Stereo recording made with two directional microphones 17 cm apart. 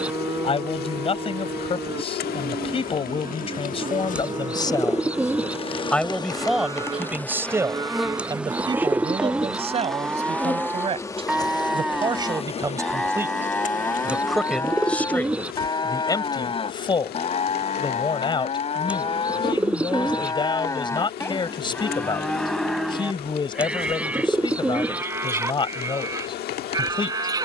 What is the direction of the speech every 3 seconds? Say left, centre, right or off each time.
left, left, centre, right, centre, left, left, left, left.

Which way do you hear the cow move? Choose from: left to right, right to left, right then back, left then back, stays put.
left then back.